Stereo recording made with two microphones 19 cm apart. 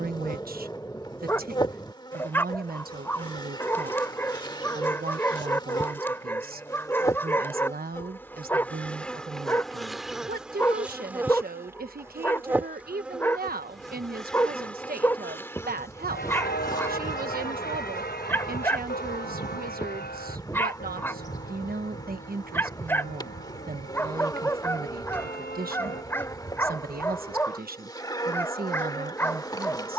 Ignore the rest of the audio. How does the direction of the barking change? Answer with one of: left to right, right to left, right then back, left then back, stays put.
stays put.